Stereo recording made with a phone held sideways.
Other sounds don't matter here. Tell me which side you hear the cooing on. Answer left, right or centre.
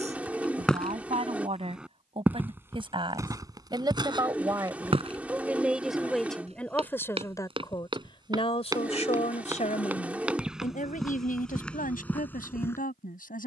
centre.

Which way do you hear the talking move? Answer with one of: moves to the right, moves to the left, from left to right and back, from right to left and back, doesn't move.
moves to the left.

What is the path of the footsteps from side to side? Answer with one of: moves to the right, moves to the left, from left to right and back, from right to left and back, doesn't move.
from left to right and back.